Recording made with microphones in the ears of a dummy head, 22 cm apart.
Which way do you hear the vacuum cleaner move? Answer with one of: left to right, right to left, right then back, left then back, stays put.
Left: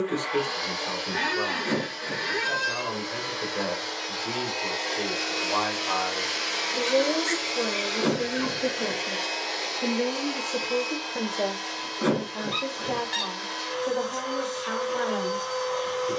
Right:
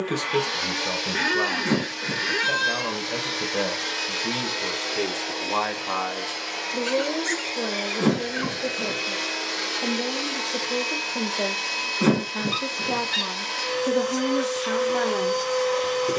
left then back.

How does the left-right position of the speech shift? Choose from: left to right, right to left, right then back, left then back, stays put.
left then back.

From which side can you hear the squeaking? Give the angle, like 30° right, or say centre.
20° right.